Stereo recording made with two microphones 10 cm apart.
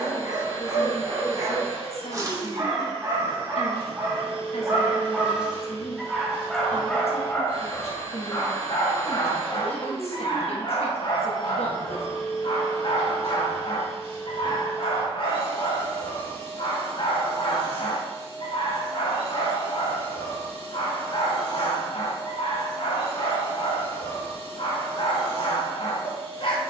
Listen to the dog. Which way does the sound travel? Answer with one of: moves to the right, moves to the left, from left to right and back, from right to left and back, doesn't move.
moves to the left.